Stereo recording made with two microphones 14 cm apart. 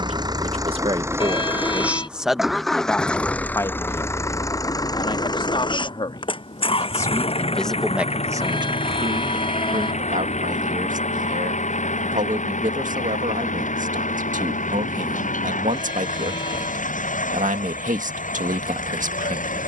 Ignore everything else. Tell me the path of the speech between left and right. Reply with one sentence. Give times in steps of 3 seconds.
You can hear the speech on the right from 0 s, on the left from 3 s, in the centre from 6 s and on the right from 9 s.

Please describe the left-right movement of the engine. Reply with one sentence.
In this clip you hear the engine travel towards the left.